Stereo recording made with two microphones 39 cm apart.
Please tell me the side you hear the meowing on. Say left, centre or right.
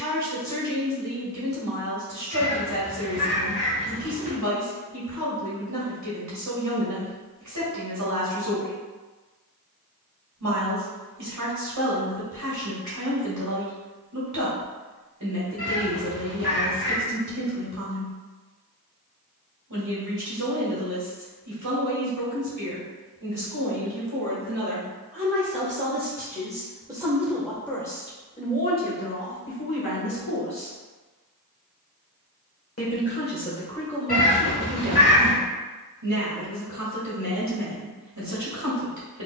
left.